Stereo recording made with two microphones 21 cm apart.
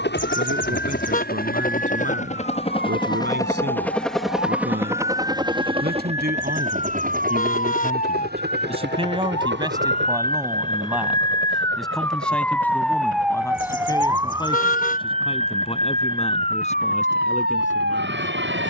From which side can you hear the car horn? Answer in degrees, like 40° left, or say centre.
40° left.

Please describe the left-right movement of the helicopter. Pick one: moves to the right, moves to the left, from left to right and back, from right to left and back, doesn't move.
moves to the right.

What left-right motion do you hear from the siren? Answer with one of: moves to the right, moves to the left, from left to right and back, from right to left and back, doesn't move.
moves to the right.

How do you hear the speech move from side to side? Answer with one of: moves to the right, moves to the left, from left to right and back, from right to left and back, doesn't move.
moves to the left.